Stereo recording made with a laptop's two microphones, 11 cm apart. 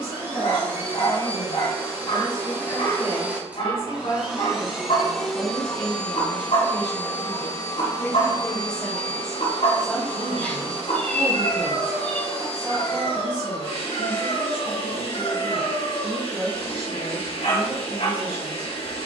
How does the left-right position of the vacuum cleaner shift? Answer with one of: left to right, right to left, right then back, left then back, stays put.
right to left.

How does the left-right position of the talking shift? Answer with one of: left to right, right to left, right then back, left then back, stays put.
left to right.